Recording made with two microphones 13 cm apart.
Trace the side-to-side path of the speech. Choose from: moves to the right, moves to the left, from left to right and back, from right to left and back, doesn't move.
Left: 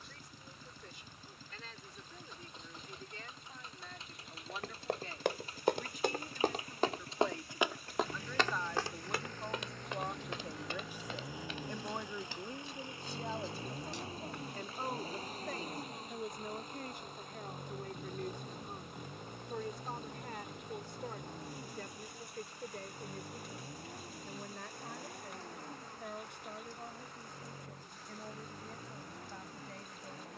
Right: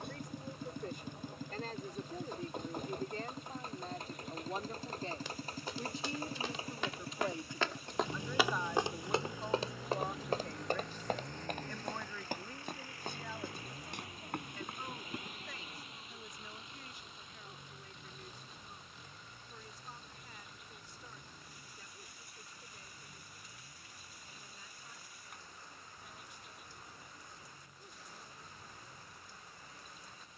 moves to the left.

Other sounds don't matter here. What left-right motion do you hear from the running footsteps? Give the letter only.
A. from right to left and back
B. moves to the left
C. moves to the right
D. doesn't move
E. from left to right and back
C.